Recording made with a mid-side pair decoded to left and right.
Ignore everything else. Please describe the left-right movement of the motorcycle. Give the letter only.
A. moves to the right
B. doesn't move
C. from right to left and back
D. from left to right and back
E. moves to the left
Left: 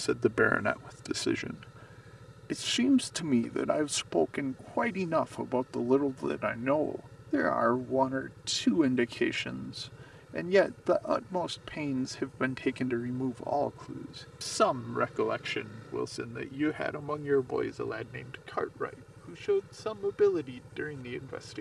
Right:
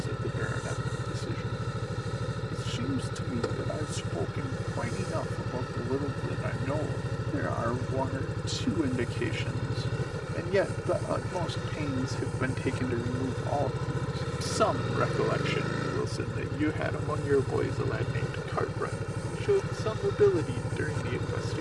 B.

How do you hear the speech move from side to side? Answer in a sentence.
In this clip you hear the speech go from the left side to the right.